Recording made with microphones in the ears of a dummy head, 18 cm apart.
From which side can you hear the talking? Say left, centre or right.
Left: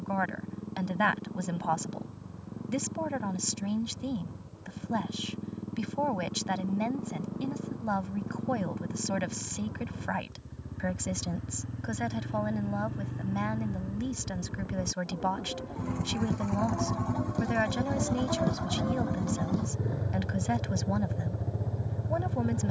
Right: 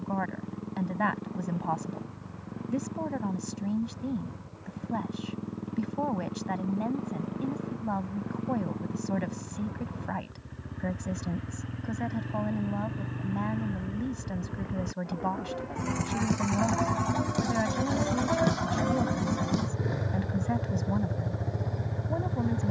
left.